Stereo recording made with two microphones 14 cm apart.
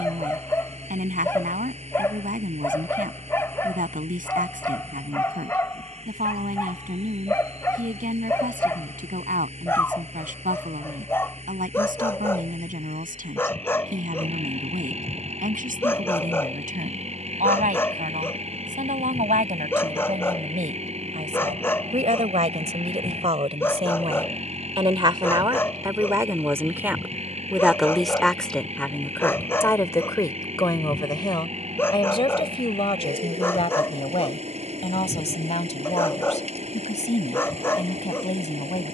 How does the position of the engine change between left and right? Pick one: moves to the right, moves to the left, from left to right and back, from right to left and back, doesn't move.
doesn't move.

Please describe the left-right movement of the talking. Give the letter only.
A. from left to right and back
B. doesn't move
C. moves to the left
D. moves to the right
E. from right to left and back
C.